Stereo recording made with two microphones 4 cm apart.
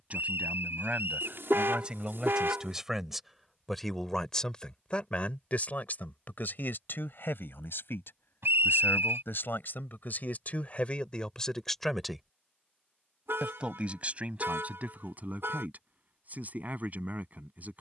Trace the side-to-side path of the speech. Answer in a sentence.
You can hear the speech go left and come back.